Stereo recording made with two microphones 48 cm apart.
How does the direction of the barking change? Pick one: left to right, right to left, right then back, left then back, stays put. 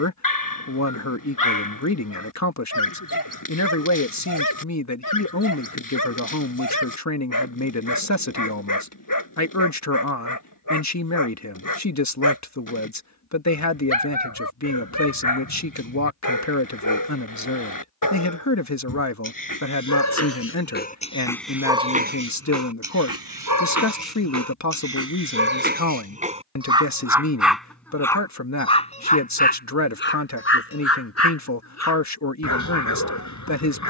right then back.